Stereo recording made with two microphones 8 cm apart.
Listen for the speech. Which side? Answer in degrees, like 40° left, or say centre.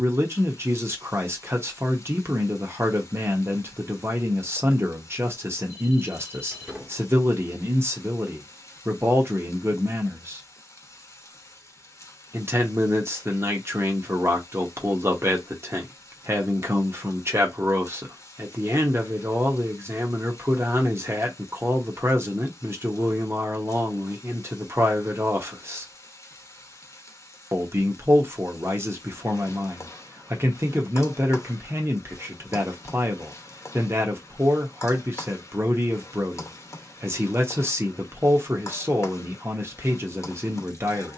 30° right.